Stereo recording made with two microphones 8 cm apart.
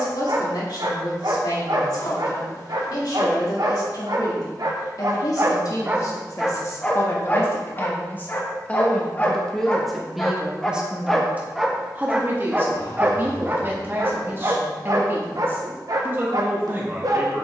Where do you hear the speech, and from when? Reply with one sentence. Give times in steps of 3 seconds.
You can hear the speech on the left from 0 s, in the centre from 9 s and on the right from 12 s.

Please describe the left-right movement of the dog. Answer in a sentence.
You can hear the dog go left and come back.